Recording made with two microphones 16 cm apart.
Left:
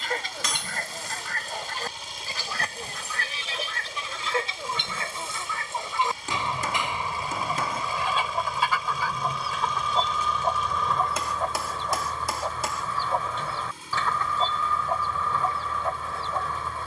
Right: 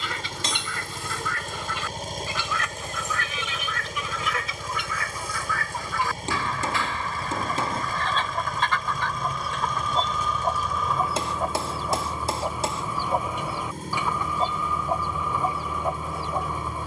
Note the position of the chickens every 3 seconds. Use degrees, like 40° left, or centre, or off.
40° left, 30° left, 10° left, centre, 10° right, 10° right.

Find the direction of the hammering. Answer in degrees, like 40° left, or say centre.
30° right.